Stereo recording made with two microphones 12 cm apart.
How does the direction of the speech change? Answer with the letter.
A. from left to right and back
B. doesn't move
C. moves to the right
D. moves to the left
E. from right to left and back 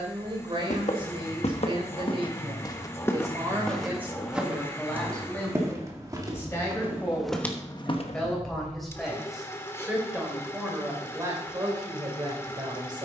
E.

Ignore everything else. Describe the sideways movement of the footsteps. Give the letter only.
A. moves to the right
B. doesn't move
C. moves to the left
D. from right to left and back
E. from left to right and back
E.